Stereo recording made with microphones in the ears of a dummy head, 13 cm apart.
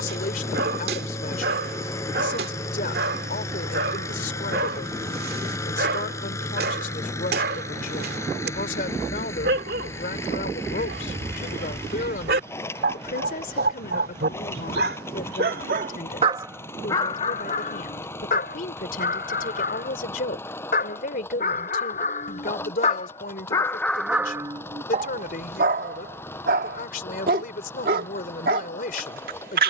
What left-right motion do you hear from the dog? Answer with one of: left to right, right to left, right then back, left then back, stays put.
left then back.